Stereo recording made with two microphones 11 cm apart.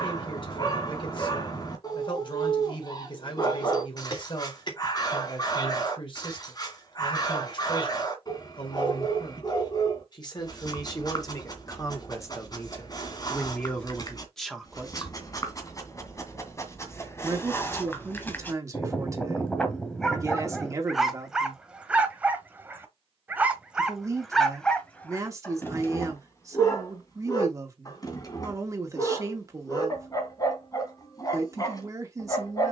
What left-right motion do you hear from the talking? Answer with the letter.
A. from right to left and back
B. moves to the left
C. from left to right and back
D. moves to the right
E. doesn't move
D.